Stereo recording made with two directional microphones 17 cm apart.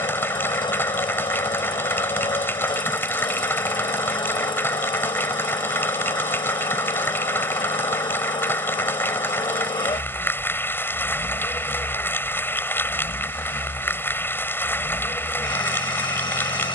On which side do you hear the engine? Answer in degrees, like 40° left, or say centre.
30° left.